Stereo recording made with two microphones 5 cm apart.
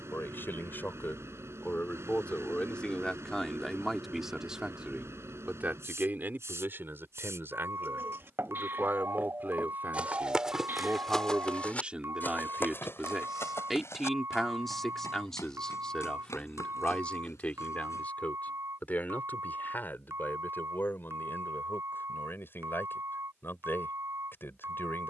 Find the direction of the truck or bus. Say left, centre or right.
right.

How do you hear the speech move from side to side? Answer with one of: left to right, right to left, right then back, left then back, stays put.
right then back.